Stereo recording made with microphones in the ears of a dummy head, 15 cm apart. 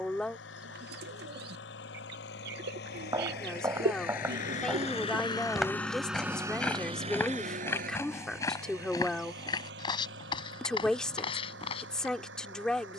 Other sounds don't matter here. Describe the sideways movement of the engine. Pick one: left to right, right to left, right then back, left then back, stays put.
left to right.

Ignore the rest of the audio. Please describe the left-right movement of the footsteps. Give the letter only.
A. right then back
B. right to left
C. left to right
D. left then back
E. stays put
B.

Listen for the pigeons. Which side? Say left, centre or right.
right.